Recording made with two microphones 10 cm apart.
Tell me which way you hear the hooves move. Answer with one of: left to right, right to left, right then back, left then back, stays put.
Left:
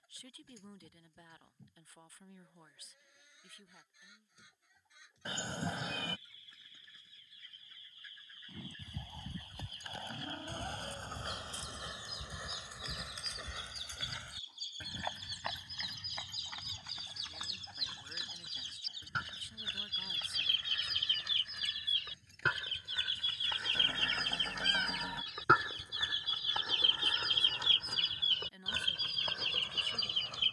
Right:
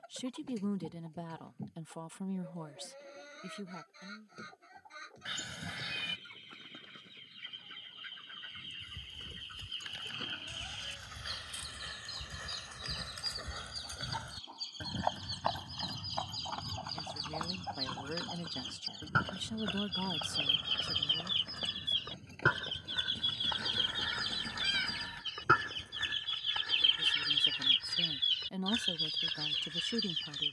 left to right.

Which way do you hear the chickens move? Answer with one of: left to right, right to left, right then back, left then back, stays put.
right to left.